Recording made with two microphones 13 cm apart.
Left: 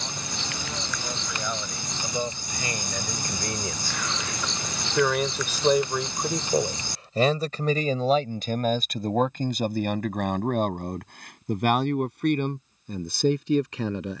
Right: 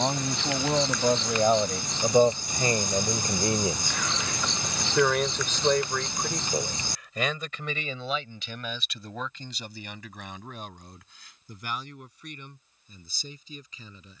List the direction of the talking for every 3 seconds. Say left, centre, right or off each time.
right, centre, left, left, left.